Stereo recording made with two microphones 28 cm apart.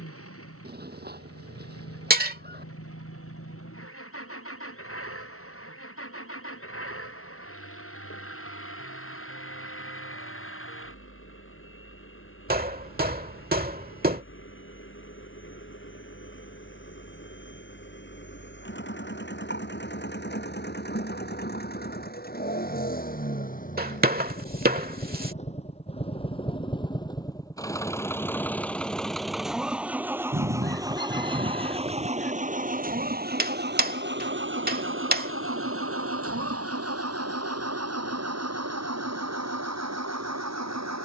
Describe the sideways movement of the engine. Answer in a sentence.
In this clip you hear the engine travel towards the right.